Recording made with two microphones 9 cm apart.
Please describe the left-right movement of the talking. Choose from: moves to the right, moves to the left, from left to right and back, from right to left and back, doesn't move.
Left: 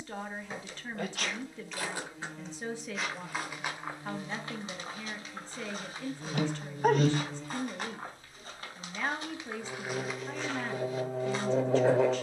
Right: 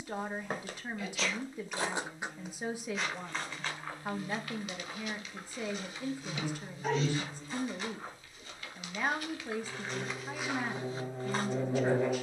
doesn't move.